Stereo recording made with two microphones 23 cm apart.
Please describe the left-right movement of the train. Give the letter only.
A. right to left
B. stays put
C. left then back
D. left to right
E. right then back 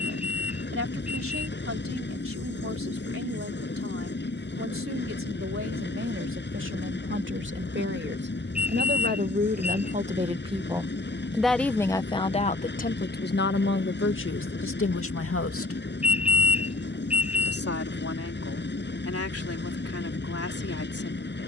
B.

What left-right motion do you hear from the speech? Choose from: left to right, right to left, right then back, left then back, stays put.
right to left.